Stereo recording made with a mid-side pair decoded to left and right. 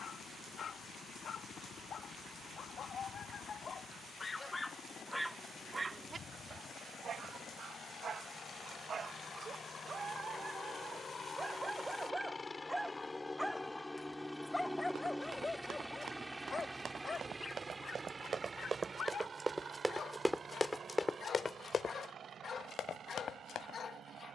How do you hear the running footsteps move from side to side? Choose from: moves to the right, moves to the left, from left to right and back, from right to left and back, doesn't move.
moves to the left.